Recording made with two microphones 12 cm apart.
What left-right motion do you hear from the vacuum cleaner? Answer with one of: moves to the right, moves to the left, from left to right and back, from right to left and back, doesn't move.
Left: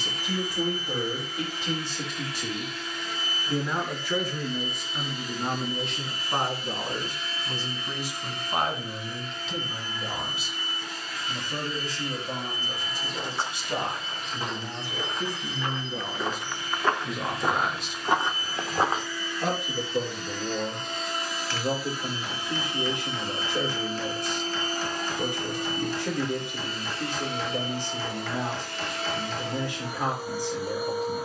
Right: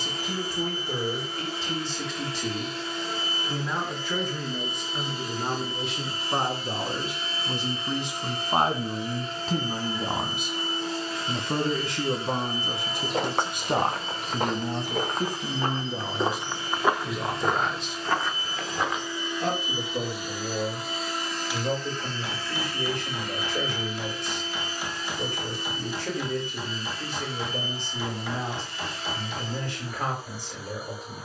moves to the left.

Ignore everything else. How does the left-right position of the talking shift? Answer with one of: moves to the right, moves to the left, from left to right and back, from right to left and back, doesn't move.
from left to right and back.